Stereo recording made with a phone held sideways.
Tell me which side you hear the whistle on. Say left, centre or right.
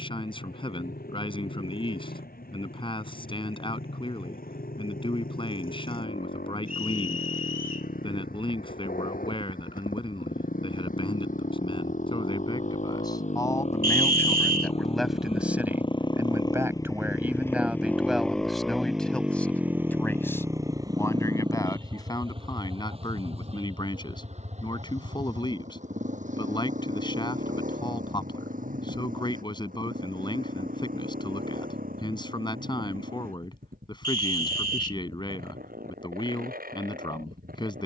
right.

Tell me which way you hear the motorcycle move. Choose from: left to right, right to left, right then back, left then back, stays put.
left to right.